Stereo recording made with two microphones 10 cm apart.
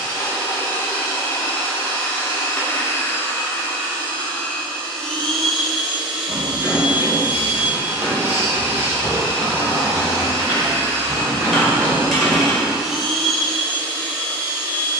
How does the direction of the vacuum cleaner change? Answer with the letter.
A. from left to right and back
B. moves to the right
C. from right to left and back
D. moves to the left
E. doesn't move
A.